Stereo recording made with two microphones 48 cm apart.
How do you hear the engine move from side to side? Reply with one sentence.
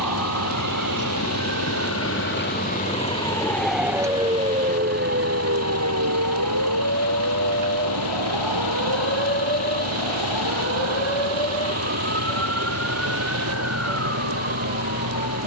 In this clip you hear the engine stay in one place.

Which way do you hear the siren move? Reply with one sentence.
You can hear the siren move from left to right.